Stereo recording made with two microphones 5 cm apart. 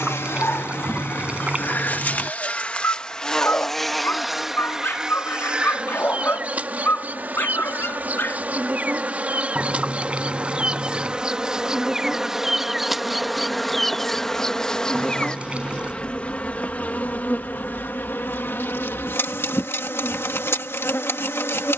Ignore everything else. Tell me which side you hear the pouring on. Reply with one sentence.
You can hear the pouring on the right.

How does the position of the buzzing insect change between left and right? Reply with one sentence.
You can hear the buzzing insect go right and come back.